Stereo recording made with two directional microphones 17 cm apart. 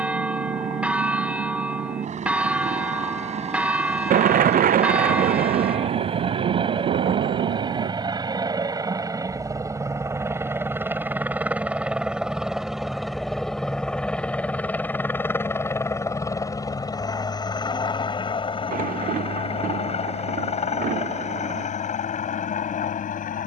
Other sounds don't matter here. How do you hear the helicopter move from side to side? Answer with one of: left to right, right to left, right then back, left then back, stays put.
right to left.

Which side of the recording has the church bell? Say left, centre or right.
centre.